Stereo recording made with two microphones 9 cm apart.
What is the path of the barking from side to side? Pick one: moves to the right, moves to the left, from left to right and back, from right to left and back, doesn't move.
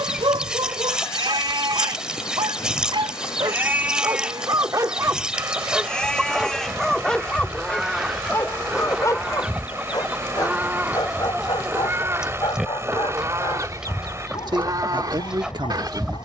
moves to the left.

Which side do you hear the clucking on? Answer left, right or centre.
centre.